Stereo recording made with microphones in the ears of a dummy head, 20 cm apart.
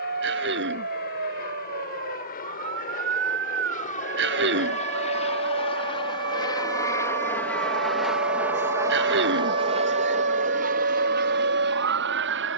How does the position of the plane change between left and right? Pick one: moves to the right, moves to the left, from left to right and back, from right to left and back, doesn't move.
moves to the right.